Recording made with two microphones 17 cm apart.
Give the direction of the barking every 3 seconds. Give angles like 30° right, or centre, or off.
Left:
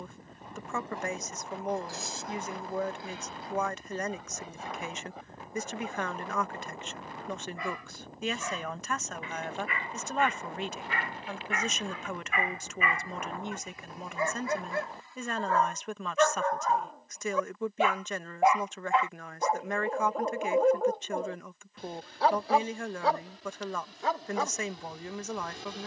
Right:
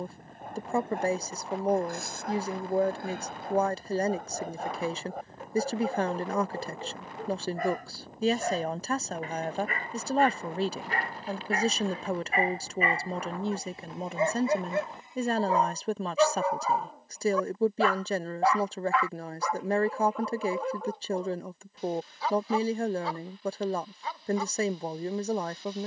50° right, 50° right, 50° right, 40° right, 30° right, 10° right, 30° left, 60° left, 80° left.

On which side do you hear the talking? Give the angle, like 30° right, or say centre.
30° right.